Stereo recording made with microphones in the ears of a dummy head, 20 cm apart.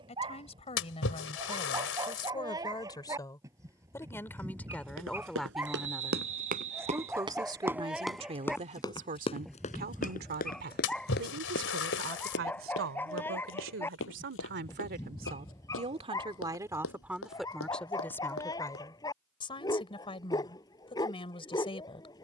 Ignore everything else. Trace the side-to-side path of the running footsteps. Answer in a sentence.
In this clip you hear the running footsteps travel towards the left.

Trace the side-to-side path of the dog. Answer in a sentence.
In this clip you hear the dog move from right to left.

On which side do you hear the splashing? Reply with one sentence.
You can hear the splashing on the left.